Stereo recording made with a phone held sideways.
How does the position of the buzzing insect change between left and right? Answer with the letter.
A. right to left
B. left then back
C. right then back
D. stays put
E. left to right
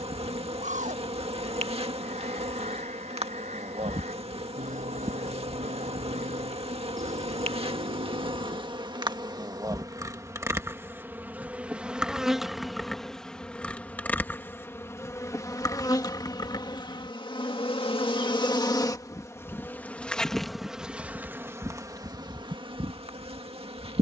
B.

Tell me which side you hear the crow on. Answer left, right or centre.
right.